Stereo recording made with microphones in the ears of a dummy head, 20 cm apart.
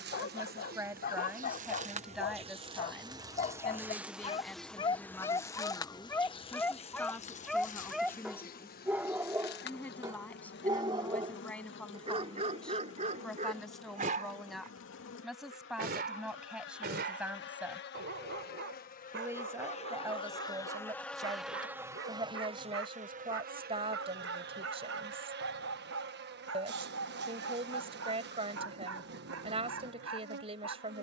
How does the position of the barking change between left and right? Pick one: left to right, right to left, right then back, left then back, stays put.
left to right.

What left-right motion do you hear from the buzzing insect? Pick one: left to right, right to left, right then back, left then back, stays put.
left then back.